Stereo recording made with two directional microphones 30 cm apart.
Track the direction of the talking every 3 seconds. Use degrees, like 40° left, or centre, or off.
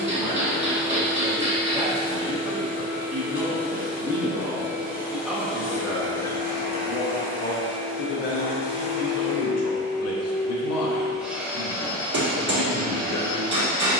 20° right, 10° right, 30° left, 60° left, 60° left.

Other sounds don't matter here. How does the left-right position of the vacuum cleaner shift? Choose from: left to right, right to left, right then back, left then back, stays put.
left to right.